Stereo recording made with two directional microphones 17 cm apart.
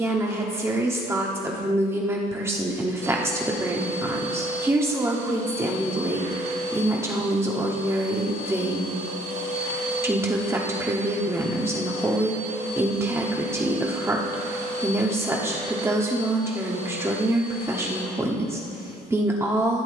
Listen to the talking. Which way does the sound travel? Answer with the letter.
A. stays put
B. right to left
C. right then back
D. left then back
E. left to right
A.